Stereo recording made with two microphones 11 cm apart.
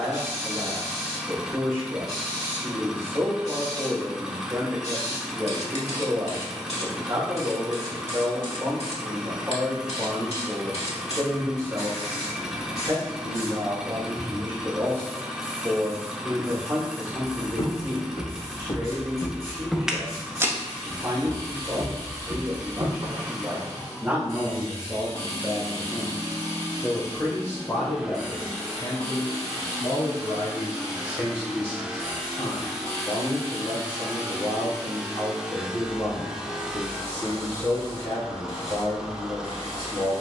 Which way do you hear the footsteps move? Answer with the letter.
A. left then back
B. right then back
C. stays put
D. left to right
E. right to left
D.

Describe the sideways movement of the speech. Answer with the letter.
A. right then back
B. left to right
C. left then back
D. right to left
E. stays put
D.